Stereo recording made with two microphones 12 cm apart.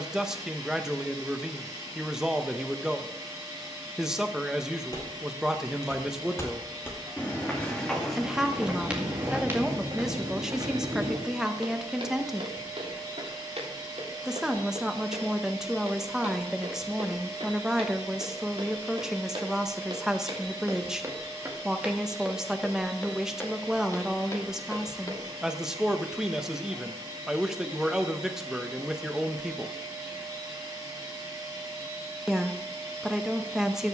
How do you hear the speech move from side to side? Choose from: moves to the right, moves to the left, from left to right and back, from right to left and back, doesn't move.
doesn't move.